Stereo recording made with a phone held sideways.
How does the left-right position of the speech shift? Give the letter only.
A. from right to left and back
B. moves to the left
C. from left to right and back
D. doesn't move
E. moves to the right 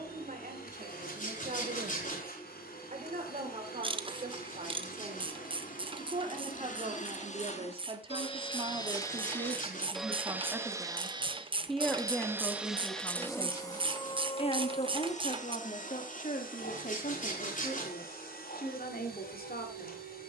B.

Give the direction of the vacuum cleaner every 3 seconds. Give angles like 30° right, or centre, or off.
70° left, 70° left, 50° left, 10° right, 20° left, 60° left, 70° left.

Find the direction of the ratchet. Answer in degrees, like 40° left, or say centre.
30° right.